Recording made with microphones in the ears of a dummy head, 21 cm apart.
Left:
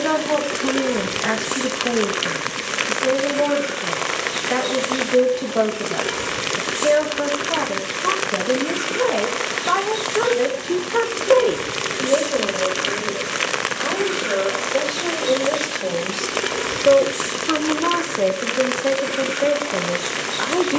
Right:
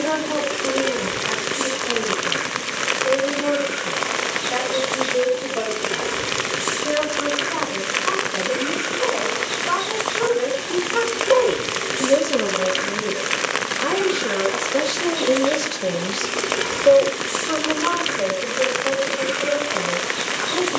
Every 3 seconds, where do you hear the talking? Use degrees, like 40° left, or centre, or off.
70° left, 70° left, 70° left, 50° left, 40° right, centre, 60° left.